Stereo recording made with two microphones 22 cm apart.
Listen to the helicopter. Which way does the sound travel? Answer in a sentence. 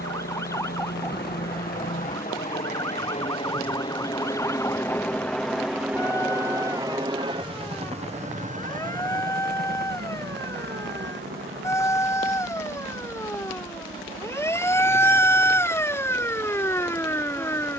You can hear the helicopter travel towards the right.